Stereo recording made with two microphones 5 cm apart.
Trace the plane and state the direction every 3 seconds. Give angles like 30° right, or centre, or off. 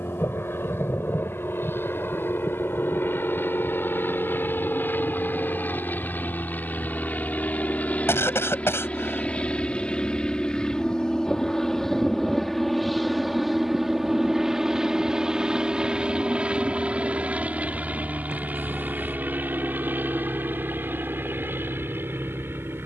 60° left, 50° left, 40° left, 20° left, centre, 20° right, 40° right, 50° right.